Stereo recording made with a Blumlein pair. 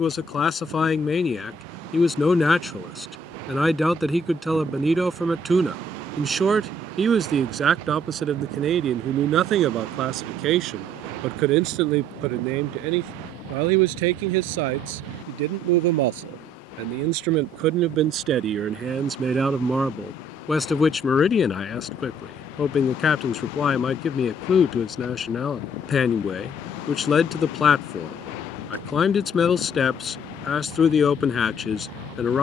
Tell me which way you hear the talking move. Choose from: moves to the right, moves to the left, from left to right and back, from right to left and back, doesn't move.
from left to right and back.